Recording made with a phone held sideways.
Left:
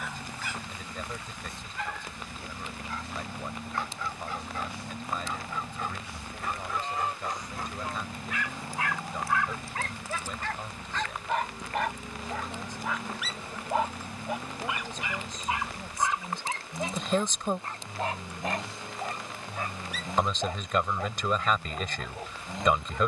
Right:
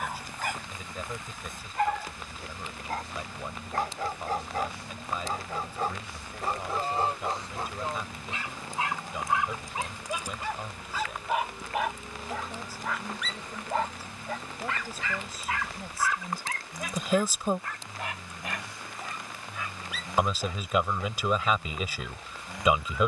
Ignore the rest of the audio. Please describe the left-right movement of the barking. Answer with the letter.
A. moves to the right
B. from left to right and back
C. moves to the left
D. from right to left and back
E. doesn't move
C.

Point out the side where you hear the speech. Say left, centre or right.
centre.